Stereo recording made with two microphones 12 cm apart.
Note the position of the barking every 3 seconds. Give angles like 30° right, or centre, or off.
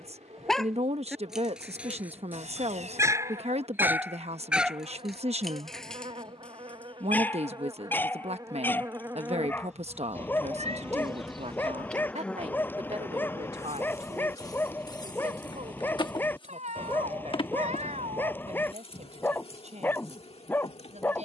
10° right, 10° right, 10° left, 20° left, 20° left, 20° left, 20° left.